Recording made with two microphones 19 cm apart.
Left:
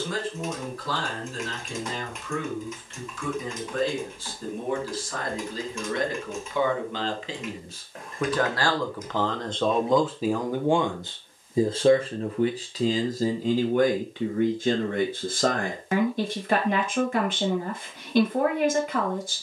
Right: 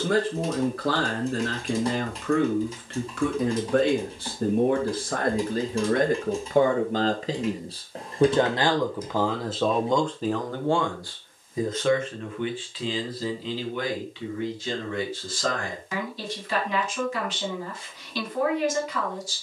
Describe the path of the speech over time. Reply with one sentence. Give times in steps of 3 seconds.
In this clip you hear the speech on the right from 0 s, in the centre from 9 s and on the left from 12 s.